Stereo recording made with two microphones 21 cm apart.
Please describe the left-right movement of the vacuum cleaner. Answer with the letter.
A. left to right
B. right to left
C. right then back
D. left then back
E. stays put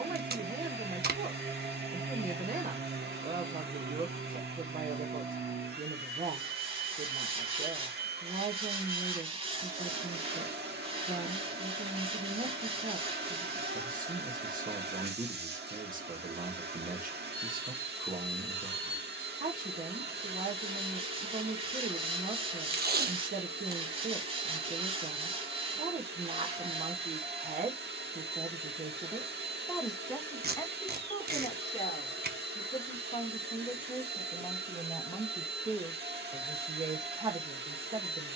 E.